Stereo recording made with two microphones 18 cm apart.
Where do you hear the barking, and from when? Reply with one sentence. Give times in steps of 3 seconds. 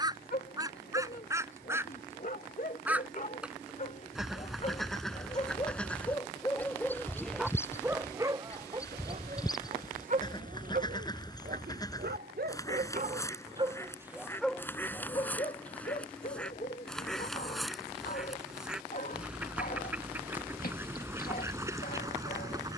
In this clip you hear the barking on the left from 0 s, in the centre from 6 s, on the right from 9 s and on the left from 15 s.